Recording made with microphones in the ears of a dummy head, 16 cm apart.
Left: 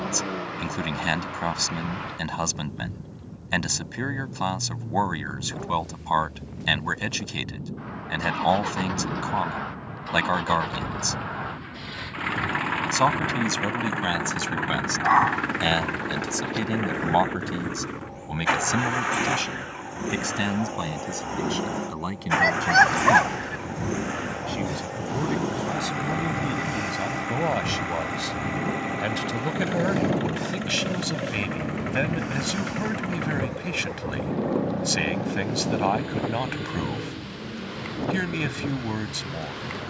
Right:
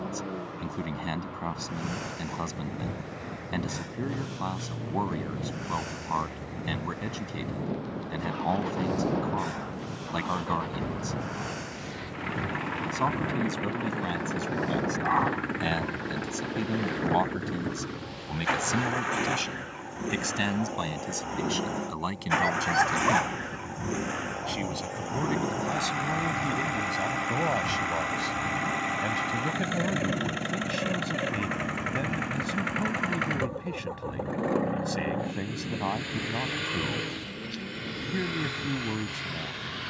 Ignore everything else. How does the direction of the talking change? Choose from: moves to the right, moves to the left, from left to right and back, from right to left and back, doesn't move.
from left to right and back.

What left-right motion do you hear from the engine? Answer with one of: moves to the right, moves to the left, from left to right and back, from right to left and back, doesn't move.
moves to the right.